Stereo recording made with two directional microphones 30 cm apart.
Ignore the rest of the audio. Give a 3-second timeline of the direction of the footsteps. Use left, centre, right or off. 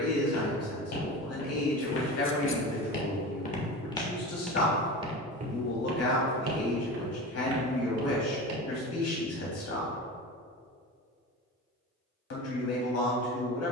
left, centre, right, off, off.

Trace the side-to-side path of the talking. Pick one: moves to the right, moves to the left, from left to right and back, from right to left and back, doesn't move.
doesn't move.